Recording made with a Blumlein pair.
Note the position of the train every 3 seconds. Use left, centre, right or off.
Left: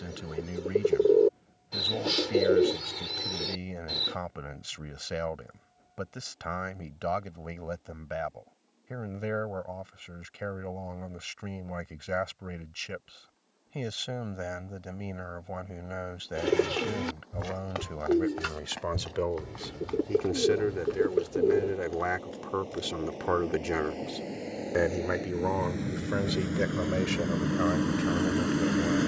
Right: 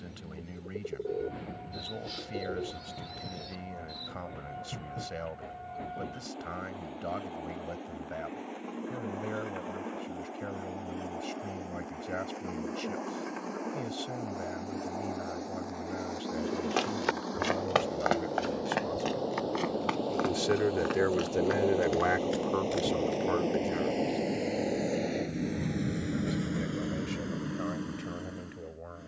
right, right, right, right, right, right, right, right, centre, left.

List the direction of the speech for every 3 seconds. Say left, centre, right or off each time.
left, left, left, left, left, left, left, centre, left, left.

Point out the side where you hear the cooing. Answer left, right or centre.
left.